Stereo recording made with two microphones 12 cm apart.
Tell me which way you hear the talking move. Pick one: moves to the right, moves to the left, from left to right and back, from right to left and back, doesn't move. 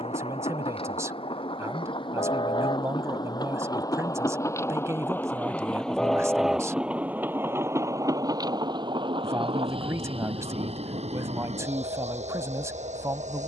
doesn't move.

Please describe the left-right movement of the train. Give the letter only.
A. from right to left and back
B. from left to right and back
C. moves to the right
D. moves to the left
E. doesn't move
C.